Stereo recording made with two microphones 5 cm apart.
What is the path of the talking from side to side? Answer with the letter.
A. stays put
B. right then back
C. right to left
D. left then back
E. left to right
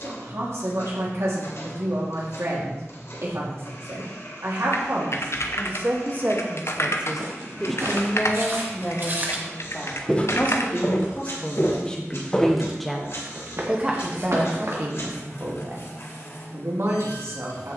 D.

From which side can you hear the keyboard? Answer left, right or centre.
left.